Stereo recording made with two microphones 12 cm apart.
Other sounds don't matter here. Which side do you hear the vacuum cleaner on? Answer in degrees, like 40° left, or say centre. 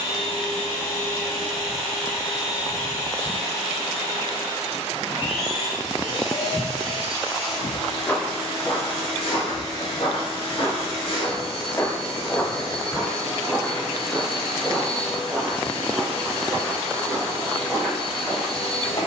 50° left.